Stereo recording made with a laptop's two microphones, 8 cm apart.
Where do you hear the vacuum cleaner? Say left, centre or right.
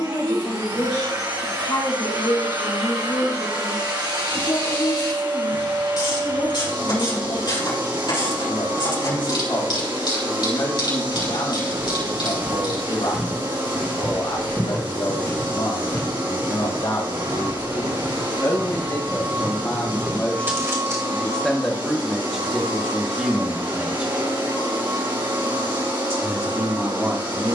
right.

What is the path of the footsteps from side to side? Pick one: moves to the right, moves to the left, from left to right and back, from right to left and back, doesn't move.
from right to left and back.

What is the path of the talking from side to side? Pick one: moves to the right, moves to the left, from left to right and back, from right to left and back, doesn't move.
moves to the right.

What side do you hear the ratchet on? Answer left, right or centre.
left.